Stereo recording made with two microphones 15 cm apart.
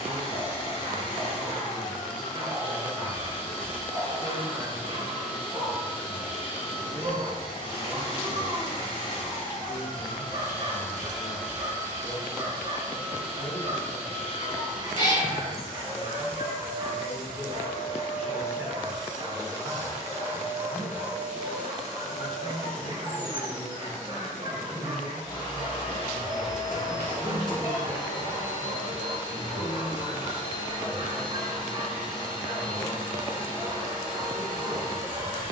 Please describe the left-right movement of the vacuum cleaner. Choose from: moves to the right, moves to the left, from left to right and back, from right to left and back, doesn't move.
from left to right and back.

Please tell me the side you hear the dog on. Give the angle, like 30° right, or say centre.
40° right.